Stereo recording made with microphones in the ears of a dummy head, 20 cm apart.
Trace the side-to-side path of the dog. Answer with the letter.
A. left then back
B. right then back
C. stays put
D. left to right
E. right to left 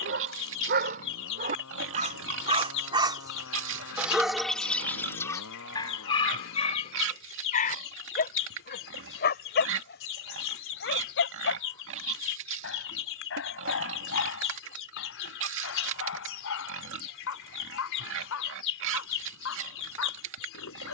E.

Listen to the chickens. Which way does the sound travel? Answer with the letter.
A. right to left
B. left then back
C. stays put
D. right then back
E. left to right
C.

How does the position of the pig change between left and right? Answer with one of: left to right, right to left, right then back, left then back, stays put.
stays put.